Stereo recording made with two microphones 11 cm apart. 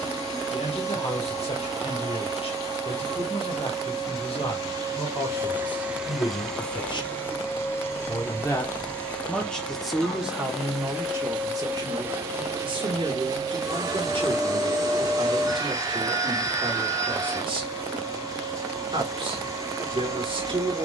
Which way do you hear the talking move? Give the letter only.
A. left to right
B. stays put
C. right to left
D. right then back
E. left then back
A.